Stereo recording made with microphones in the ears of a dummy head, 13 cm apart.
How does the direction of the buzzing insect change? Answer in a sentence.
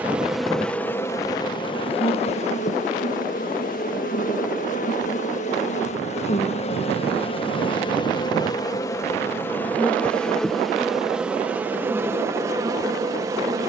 You can hear the buzzing insect go left and come back.